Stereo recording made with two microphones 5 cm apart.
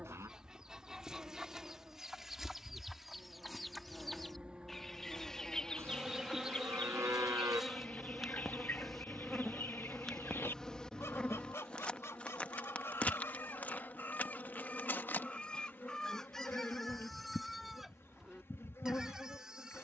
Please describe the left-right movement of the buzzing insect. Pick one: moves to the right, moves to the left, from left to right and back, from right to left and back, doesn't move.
moves to the left.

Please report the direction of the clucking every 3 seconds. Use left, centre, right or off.
centre, centre, left, left, left, centre, centre.